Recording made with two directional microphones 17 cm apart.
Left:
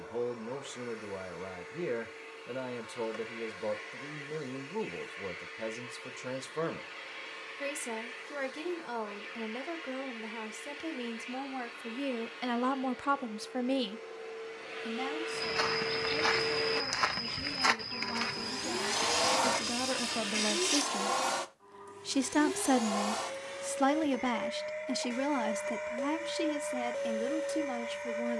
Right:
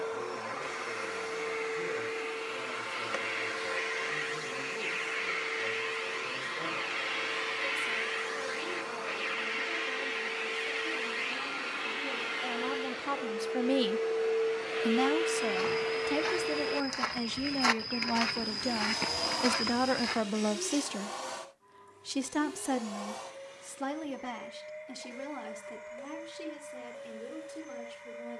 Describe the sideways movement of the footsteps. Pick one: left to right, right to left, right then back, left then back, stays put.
left to right.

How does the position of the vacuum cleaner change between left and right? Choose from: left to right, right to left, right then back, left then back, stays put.
right to left.